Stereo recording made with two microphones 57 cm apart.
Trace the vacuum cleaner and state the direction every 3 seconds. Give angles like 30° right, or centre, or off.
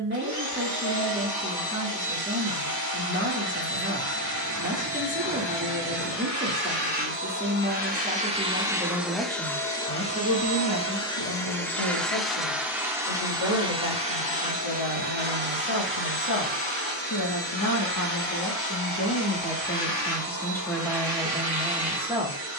40° right, 40° right, 20° right, 10° left, 10° right, 20° right, 30° right, 40° right.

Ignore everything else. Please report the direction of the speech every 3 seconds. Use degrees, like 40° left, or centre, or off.
20° right, 20° right, 20° right, 30° left, 60° left, 50° left, 10° left, 10° right.